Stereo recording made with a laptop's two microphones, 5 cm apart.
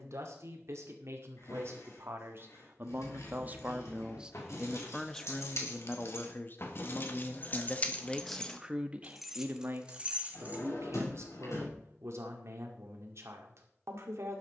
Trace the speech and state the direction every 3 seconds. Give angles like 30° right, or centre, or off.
60° right, 10° right, 20° left, 50° right, 60° right.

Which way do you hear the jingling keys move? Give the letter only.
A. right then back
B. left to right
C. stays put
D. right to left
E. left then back
B.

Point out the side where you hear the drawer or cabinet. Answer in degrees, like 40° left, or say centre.
80° left.